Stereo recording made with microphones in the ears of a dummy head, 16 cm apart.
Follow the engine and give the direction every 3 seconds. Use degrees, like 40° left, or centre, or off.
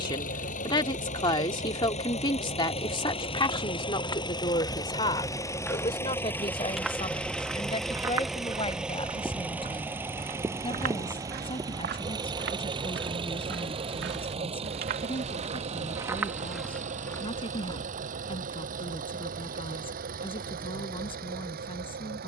40° left, 20° left, centre, 10° right, 30° right, 40° right, 40° right, 50° right.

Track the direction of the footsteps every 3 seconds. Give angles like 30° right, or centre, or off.
off, 20° left, 10° right, 40° right, 60° right, 10° right, off, off.